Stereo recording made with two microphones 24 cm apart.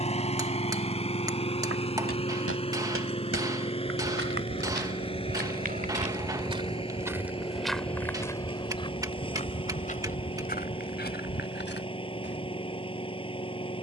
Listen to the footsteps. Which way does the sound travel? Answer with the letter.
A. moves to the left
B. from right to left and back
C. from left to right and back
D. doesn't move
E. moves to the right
A.